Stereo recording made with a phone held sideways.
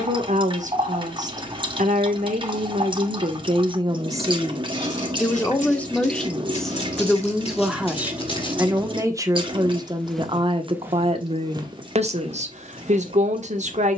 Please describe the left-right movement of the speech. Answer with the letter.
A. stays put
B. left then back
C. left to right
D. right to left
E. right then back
B.